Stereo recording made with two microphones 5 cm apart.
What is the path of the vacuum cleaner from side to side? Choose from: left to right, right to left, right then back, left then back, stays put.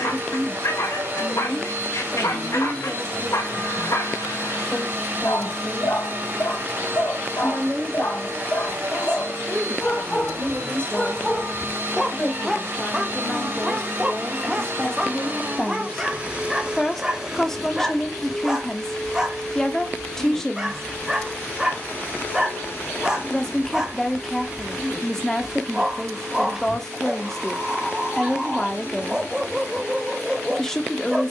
right to left.